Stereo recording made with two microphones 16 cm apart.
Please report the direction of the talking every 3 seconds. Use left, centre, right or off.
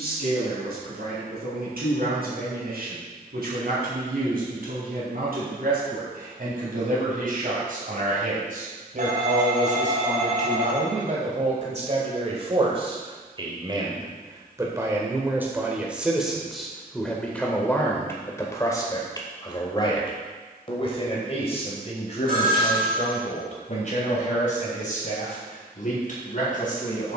right, right, right, right, right, centre, left, left, left.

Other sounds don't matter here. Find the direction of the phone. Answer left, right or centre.
right.